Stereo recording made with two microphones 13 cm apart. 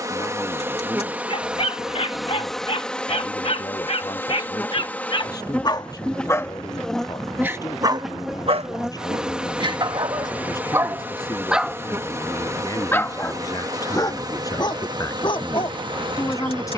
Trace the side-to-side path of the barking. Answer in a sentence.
You can hear the barking go right and come back.